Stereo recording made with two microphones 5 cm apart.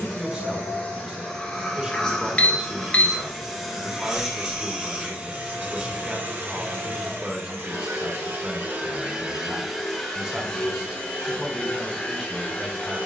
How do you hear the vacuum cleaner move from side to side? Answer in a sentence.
In this clip you hear the vacuum cleaner go right and come back.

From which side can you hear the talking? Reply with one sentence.
You can hear the talking on the right.